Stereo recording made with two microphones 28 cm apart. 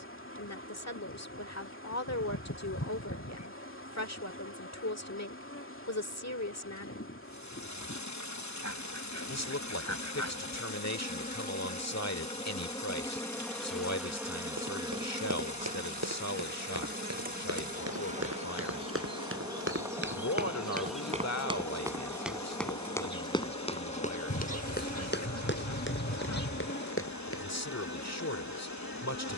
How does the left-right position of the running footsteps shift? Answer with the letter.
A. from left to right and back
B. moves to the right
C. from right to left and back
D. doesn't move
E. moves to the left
E.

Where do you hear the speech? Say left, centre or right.
left.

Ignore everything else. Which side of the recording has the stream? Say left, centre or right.
left.